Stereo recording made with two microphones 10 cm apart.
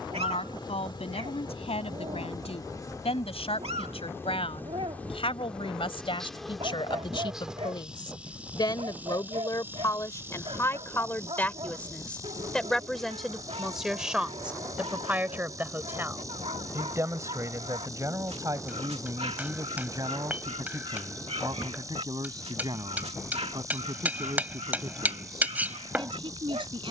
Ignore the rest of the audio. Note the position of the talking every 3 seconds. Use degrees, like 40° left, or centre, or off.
70° left, 60° left, 50° left, 30° left, centre, 20° right, 40° right, 50° right, 50° right.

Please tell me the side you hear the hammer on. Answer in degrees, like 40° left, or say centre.
20° right.